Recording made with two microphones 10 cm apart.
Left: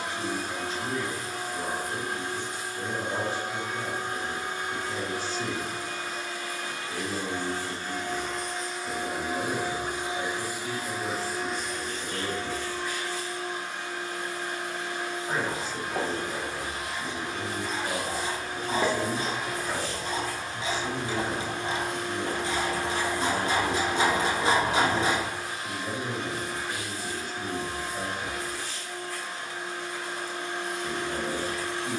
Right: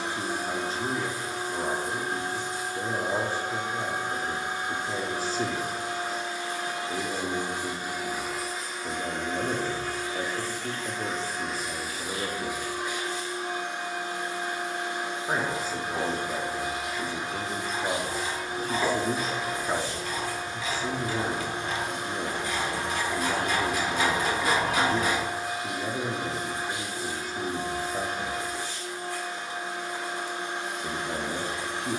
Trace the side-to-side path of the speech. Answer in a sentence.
In this clip you hear the speech stay put.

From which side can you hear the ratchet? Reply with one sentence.
You can hear the ratchet on the left.